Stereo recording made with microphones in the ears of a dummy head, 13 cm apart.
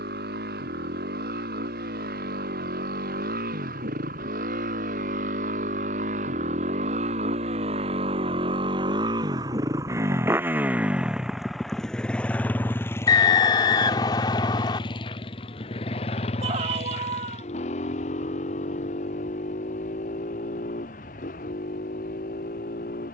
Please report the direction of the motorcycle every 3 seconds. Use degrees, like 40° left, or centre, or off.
70° right, 60° right, 40° right, 10° right, 20° left, 40° left, 50° left, 60° left.